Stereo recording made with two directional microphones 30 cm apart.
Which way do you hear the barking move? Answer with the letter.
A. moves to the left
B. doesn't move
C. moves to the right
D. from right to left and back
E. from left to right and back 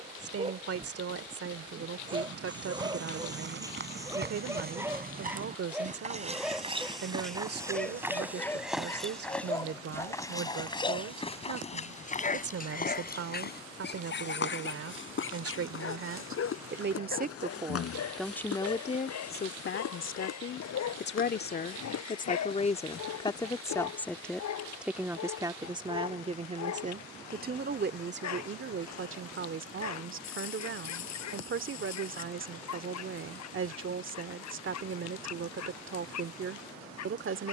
A.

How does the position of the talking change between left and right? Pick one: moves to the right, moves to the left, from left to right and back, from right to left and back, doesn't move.
from right to left and back.